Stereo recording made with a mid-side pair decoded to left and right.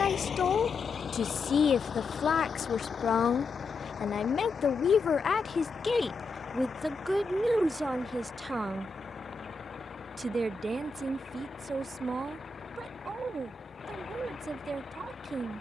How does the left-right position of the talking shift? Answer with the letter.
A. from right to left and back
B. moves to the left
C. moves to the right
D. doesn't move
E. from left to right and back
C.